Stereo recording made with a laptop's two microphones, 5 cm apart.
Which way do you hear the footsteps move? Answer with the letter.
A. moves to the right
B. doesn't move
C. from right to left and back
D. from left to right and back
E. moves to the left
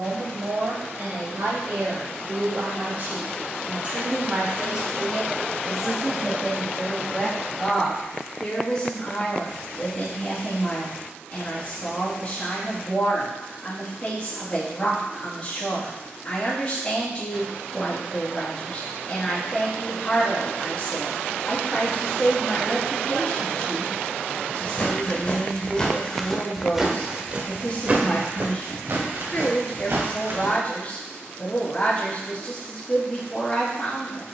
A.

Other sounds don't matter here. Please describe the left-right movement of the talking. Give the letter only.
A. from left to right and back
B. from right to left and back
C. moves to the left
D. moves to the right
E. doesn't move
C.